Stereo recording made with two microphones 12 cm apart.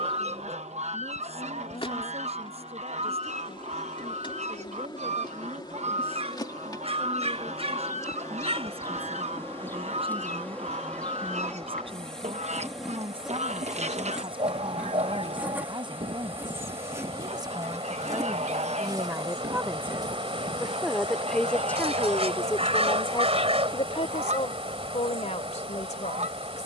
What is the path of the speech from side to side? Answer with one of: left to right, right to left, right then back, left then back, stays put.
right to left.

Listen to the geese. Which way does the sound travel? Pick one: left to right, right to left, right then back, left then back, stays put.
stays put.